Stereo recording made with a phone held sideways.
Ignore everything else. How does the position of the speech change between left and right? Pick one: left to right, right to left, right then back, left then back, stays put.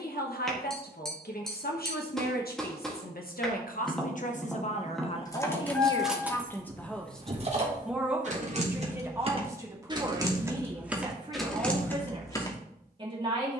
left to right.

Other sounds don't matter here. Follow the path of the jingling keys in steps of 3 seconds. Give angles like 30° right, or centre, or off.
off, 10° left, 30° right, 10° right, 20° left.